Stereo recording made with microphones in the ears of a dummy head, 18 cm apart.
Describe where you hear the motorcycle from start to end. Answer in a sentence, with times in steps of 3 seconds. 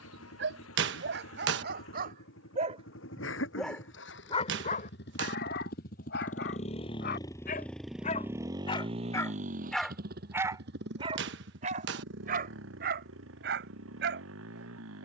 In this clip you hear the motorcycle on the left from 0 s, in the centre from 6 s and on the right from 9 s.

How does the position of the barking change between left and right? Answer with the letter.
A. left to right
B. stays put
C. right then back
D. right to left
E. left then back
E.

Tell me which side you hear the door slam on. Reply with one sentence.
You can hear the door slam on the right.